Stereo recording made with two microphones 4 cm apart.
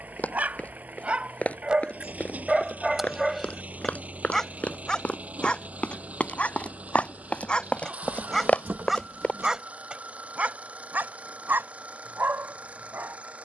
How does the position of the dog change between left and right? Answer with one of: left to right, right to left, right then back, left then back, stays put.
left then back.